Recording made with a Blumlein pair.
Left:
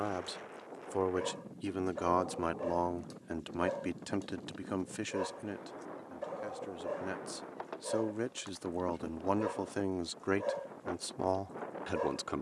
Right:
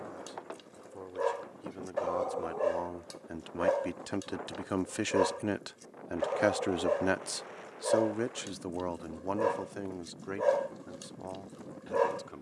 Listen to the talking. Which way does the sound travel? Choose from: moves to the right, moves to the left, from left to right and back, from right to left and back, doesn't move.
from left to right and back.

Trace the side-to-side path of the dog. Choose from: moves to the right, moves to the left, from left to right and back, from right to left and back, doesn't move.
doesn't move.